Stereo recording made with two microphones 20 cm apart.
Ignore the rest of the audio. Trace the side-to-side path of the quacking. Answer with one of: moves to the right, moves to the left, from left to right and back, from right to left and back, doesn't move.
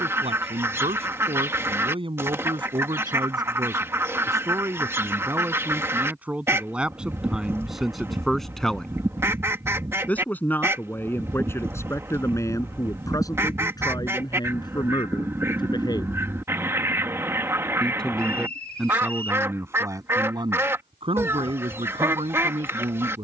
doesn't move.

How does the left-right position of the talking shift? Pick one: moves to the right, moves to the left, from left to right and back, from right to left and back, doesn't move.
from right to left and back.